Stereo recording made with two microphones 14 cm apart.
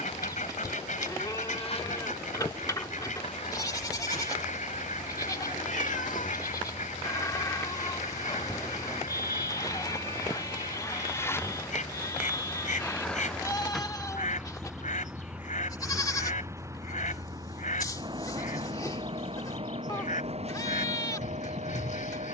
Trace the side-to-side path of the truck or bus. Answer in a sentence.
In this clip you hear the truck or bus move from left to right.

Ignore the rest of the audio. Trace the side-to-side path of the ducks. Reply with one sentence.
In this clip you hear the ducks stay put.